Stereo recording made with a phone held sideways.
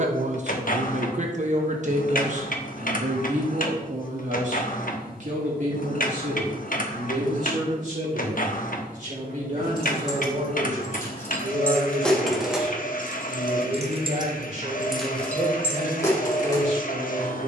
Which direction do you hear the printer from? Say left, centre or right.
left.